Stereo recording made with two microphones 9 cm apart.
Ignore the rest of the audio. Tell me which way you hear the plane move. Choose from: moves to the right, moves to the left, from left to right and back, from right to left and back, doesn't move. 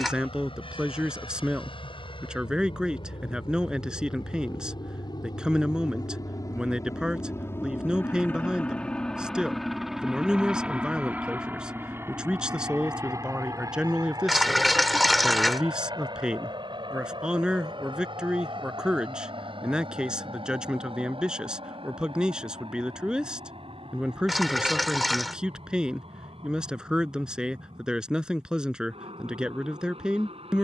moves to the right.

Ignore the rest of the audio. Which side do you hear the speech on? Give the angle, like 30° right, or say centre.
10° right.